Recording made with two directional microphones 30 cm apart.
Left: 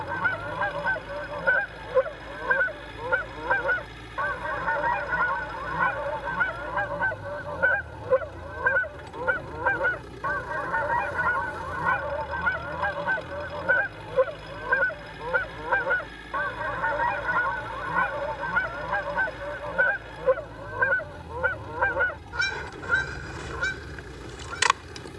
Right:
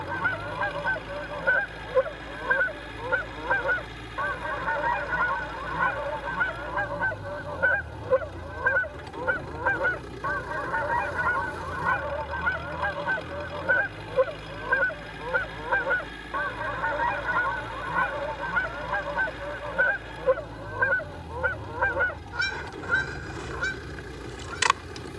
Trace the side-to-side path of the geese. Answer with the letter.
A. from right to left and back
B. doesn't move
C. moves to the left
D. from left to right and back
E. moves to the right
B.